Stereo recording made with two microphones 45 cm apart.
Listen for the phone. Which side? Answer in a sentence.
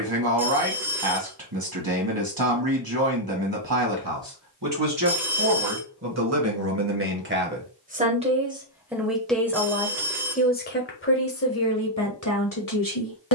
In this clip you hear the phone in the centre.